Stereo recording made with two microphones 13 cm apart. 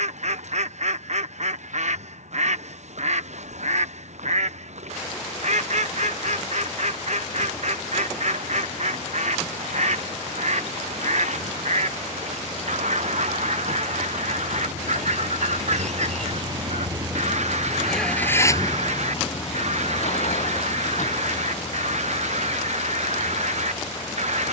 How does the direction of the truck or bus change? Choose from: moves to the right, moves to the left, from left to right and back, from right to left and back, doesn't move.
moves to the left.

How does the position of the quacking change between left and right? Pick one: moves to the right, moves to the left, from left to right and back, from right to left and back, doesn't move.
doesn't move.